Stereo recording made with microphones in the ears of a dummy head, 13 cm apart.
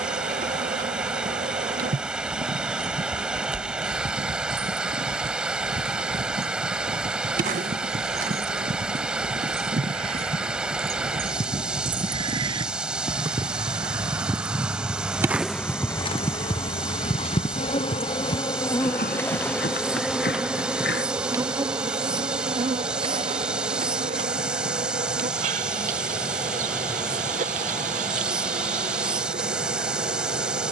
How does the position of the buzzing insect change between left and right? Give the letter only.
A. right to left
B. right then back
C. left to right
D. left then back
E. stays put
D.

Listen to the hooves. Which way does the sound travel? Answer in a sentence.
You can hear the hooves travel towards the left.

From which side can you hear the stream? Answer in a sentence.
You can hear the stream in the centre.